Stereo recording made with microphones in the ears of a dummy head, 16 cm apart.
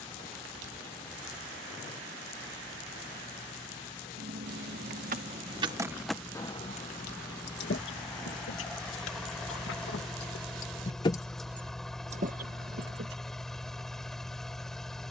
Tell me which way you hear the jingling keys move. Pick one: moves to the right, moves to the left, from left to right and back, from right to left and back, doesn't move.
from right to left and back.